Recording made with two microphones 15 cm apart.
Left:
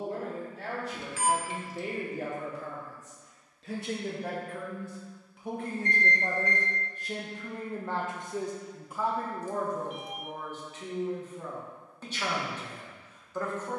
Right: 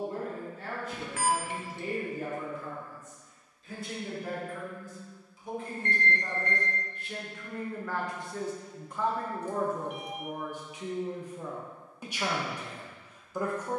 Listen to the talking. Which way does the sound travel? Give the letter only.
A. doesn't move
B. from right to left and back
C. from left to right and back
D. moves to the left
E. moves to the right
E.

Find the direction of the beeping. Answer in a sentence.
In this clip you hear the beeping on the right.